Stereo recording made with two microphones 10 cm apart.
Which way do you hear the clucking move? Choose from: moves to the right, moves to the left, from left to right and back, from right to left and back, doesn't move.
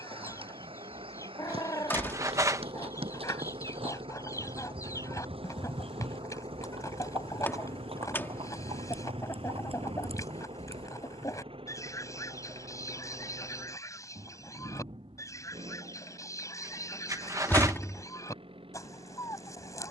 doesn't move.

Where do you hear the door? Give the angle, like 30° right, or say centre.
20° left.